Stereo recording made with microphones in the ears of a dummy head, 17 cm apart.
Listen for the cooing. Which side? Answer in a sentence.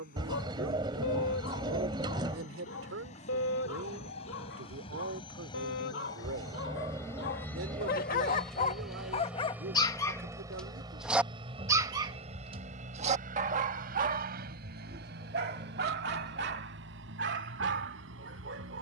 You can hear the cooing on the right.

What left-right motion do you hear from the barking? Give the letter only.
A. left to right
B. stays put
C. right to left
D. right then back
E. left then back
A.